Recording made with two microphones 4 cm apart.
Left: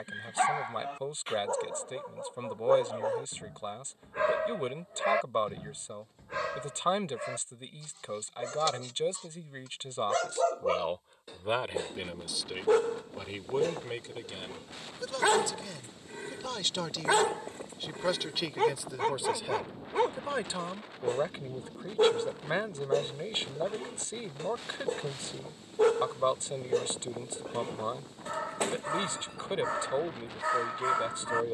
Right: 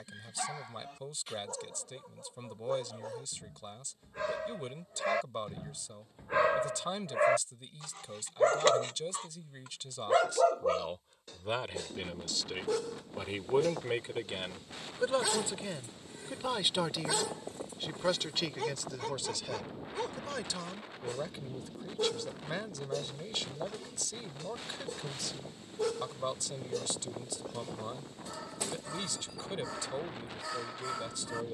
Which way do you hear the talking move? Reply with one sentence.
In this clip you hear the talking move from left to right and back again.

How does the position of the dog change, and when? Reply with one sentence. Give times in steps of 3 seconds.
You can hear the dog on the left from 0 s, on the right from 6 s, in the centre from 9 s and on the left from 12 s.